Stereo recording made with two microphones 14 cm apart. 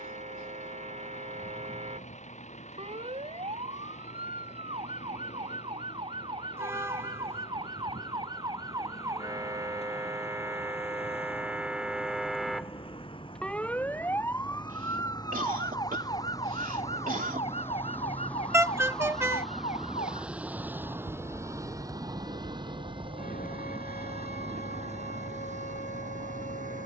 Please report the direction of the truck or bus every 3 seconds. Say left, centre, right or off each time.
left, left, left, left, left, left, centre, right, right.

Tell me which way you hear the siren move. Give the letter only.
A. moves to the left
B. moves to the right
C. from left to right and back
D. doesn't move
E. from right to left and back
A.